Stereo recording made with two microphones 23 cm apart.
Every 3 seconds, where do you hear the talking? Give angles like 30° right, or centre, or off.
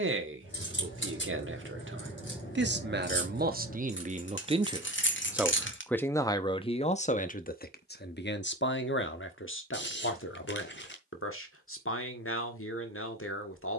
60° right, 30° right, 40° left, 60° left, 70° left.